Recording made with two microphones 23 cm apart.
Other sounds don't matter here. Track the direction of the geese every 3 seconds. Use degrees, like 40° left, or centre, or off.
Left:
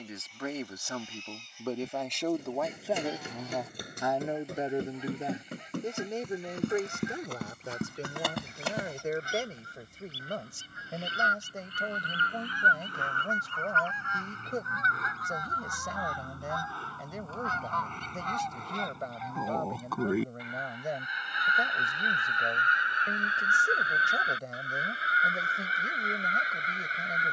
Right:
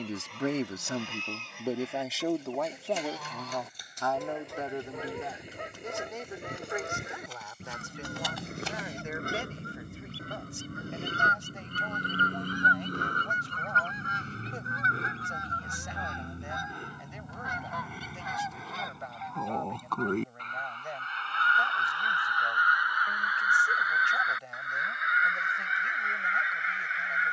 80° right, 70° right, 70° right, 60° right, 40° right, 20° right, centre, 20° left, 40° left.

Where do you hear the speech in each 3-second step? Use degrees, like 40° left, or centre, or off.
10° right, 20° left, 40° left, 50° left, 50° left, 50° left, 50° left, 50° left, 50° left.